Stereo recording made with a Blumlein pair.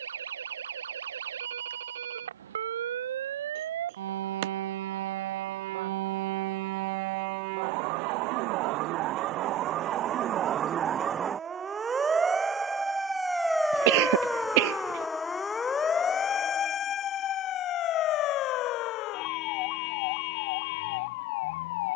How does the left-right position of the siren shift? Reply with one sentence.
You can hear the siren go from the right side to the left.